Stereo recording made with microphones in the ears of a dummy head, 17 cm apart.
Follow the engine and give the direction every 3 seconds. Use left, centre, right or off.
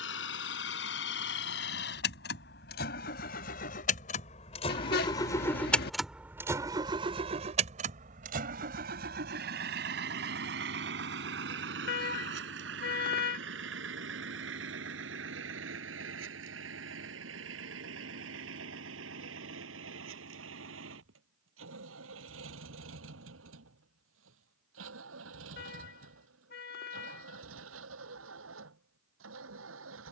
left, left, right, right, right, right, right, right, right, right.